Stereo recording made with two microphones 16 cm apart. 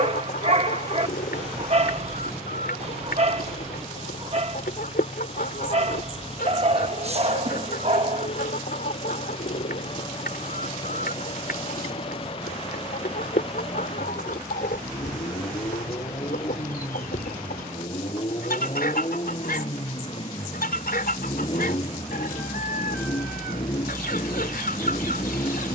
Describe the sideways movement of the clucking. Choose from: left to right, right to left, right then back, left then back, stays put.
stays put.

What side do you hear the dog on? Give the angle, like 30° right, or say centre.
40° right.